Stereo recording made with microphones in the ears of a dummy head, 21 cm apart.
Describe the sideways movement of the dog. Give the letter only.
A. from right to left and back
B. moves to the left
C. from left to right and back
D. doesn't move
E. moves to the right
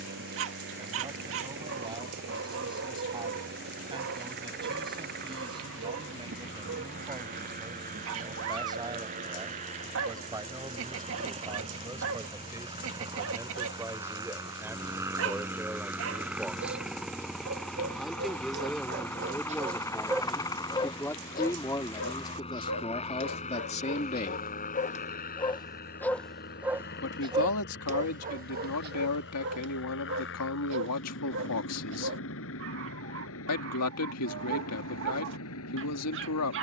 A.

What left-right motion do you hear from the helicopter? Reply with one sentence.
In this clip you hear the helicopter move to the left.